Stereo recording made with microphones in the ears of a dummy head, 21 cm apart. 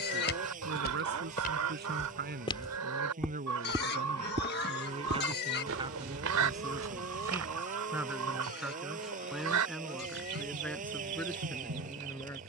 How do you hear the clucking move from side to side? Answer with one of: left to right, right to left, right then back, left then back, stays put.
stays put.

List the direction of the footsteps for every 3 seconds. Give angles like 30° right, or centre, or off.
40° left, 30° right, 70° right, off.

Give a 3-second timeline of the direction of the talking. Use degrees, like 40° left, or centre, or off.
50° right, 30° right, 10° right, 10° left.